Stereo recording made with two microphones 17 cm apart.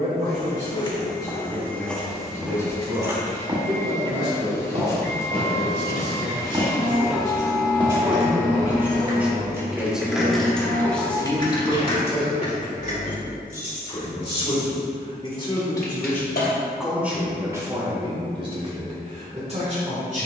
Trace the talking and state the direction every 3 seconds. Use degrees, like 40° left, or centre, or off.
50° right, 40° right, 20° right, centre, 30° left, centre, 40° right.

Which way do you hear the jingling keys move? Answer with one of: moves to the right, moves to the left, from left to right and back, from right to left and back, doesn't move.
moves to the left.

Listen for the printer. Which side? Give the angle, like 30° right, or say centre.
20° left.